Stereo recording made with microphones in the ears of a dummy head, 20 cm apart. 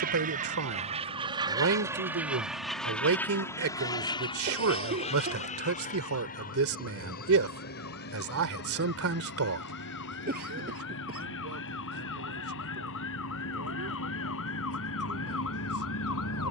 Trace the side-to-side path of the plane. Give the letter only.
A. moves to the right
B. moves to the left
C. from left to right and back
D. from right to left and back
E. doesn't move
B.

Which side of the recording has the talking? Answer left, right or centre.
right.